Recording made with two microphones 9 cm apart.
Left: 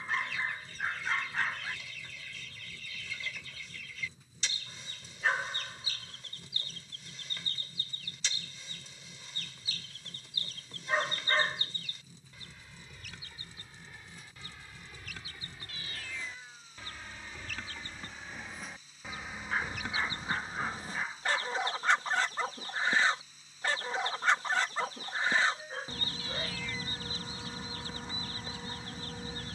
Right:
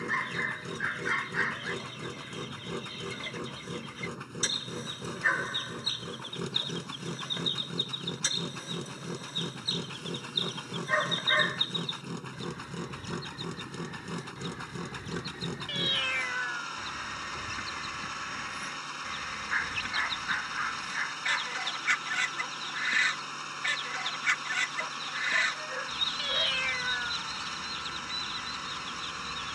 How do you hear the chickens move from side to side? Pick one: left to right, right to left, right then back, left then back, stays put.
right to left.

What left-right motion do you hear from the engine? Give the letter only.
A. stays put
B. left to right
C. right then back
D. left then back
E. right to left
A.